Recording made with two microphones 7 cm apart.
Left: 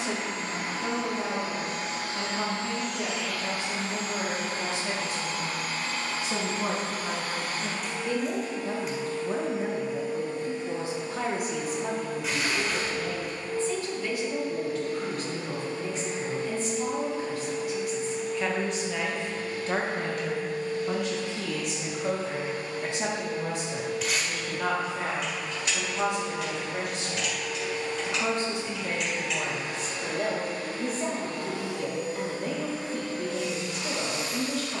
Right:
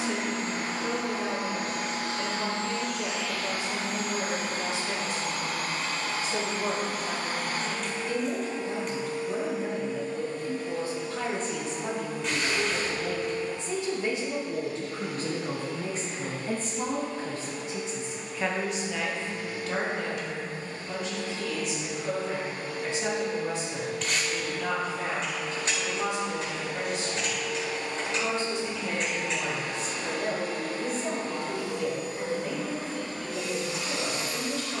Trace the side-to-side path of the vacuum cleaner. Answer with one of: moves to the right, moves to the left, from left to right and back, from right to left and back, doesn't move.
from right to left and back.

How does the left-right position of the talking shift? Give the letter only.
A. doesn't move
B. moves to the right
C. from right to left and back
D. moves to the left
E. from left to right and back
E.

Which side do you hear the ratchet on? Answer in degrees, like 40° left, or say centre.
40° right.